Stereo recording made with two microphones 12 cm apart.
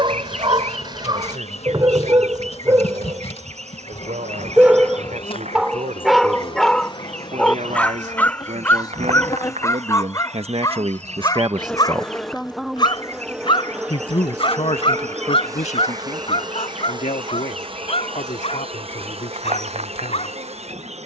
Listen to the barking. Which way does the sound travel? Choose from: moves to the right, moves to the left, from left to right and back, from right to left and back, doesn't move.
moves to the left.